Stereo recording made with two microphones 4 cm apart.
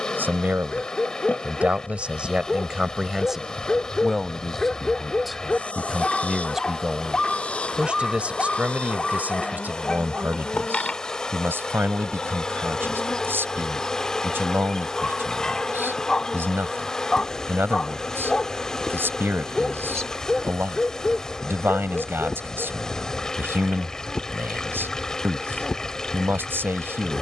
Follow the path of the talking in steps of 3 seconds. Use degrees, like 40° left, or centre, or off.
30° right, centre, 20° right, 50° right, 60° right, 60° right, 60° right, 60° right, 60° right.